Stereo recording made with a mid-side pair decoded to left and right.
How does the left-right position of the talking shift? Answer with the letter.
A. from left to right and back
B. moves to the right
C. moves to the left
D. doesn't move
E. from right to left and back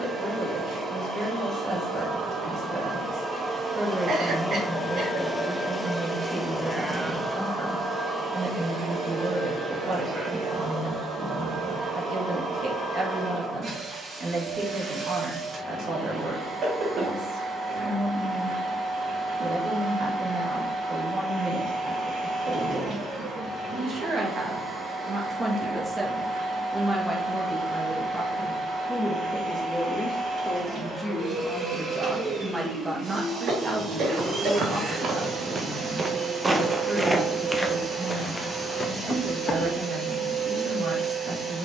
E.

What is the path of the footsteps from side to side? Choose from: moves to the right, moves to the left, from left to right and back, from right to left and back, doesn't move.
moves to the left.